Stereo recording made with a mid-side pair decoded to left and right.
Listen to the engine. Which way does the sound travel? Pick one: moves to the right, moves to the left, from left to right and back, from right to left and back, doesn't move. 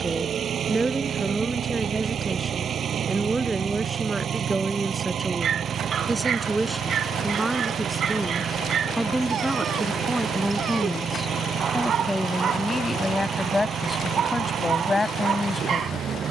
doesn't move.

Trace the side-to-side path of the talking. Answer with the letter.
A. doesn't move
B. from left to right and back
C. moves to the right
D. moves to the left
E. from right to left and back
D.